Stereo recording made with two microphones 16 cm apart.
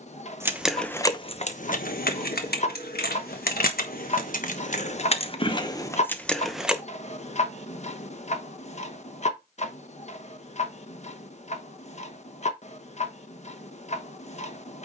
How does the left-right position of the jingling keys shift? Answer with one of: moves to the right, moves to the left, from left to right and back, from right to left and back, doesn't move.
from right to left and back.